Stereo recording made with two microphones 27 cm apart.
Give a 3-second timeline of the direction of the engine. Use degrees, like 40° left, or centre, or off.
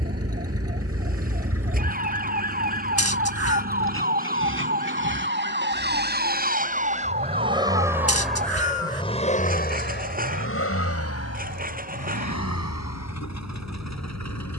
60° right, 50° right, 20° right, 50° left, 80° left.